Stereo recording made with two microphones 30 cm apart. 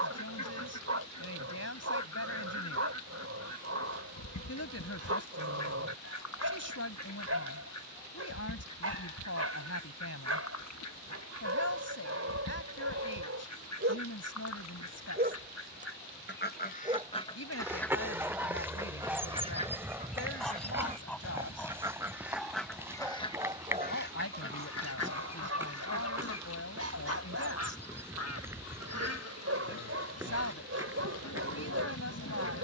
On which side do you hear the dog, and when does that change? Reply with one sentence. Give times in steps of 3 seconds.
You can hear the dog on the right from 0 s, in the centre from 18 s and on the right from 24 s.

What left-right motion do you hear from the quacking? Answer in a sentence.
In this clip you hear the quacking go right and come back.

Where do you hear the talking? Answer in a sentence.
In this clip you hear the talking on the left.